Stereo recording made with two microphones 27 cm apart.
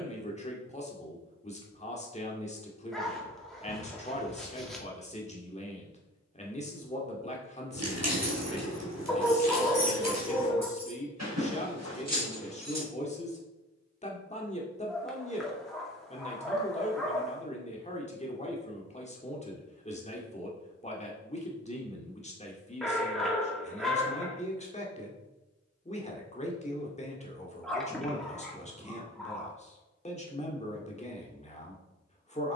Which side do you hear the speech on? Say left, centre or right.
left.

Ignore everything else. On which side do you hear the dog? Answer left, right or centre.
centre.